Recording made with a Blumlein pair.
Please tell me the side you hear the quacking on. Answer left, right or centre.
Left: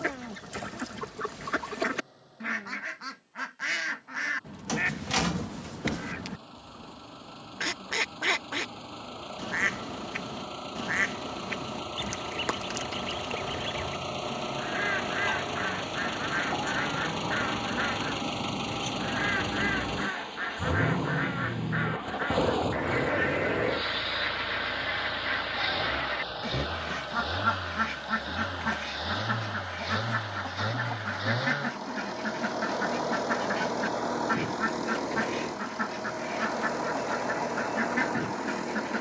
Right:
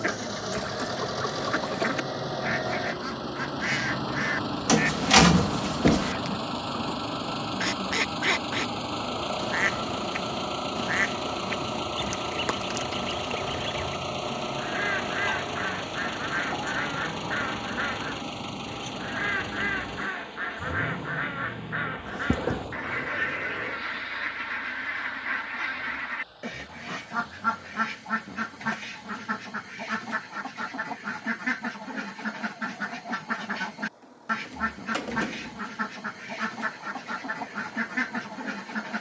centre.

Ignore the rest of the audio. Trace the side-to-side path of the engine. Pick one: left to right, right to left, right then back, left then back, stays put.
right to left.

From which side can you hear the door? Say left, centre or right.
right.